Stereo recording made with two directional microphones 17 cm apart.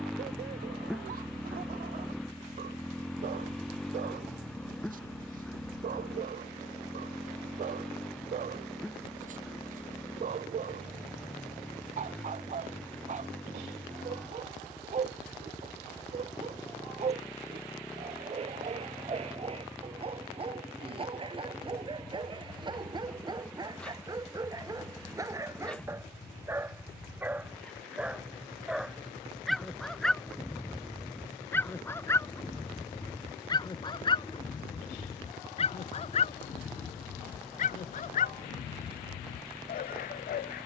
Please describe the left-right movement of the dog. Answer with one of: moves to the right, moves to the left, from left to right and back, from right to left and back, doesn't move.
moves to the left.